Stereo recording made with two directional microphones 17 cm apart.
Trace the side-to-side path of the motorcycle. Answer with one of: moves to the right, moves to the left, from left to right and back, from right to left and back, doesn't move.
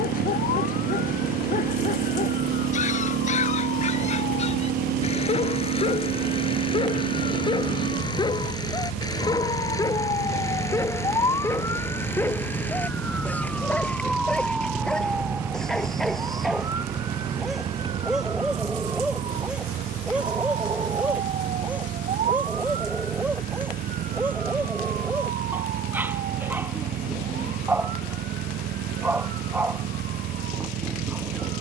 doesn't move.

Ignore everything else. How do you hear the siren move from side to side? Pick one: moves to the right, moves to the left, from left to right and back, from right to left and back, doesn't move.
moves to the right.